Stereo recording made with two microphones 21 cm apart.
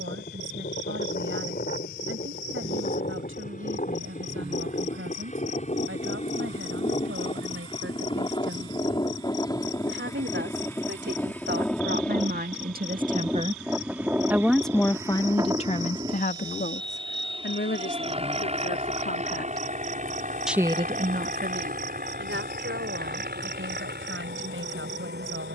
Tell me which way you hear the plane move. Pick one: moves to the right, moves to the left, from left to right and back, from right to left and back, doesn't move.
moves to the right.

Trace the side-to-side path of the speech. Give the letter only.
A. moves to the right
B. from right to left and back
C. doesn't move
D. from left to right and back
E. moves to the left
B.